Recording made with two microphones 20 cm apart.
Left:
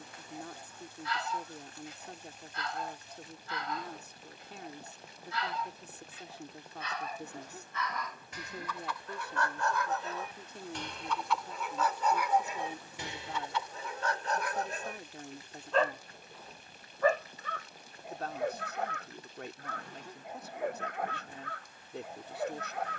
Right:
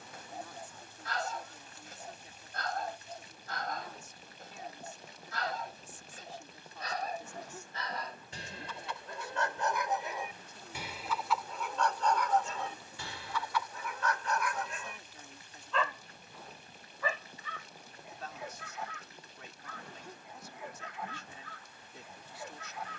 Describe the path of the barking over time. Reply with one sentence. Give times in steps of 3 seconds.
In this clip you hear the barking on the right from 0 s, in the centre from 9 s and on the left from 12 s.